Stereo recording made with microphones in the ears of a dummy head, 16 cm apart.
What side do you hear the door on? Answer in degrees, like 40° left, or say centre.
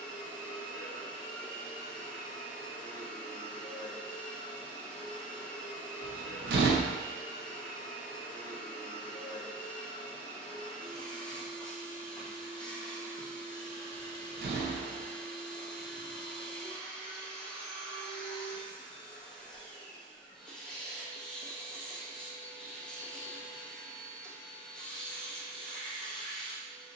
60° right.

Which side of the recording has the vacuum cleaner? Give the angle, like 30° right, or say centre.
centre.